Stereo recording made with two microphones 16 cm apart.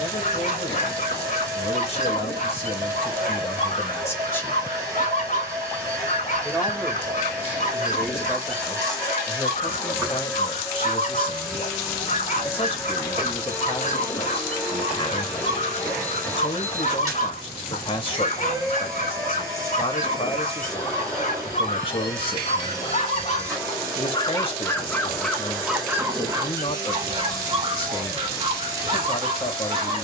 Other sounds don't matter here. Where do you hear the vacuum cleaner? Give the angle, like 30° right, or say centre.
20° right.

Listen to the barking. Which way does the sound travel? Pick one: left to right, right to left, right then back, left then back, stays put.
left to right.